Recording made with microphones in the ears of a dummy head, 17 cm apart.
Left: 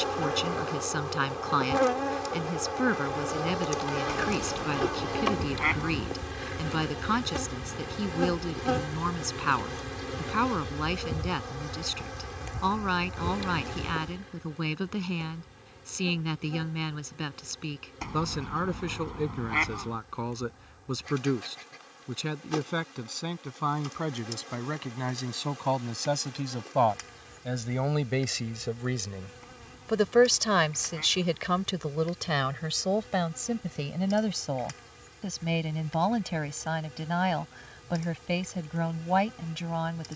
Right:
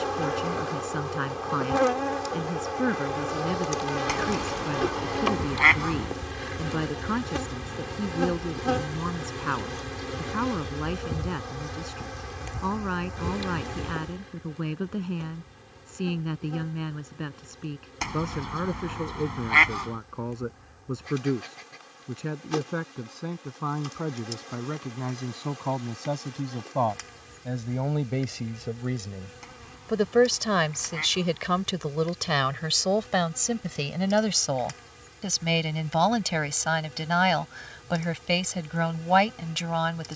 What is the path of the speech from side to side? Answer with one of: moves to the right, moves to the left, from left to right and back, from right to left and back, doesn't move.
moves to the right.